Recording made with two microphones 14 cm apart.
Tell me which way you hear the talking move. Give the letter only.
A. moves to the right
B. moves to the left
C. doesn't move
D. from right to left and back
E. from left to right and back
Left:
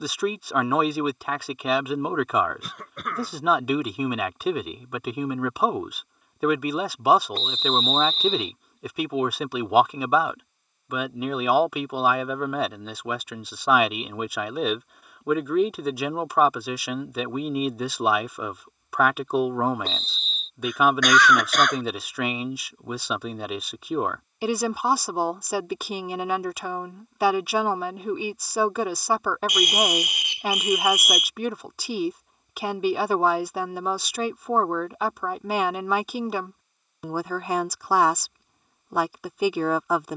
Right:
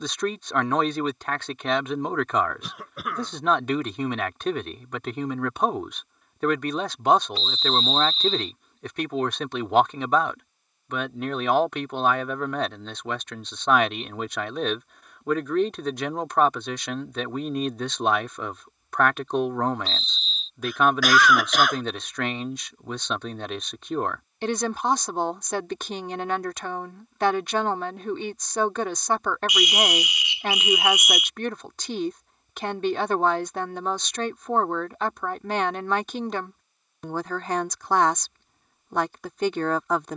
C.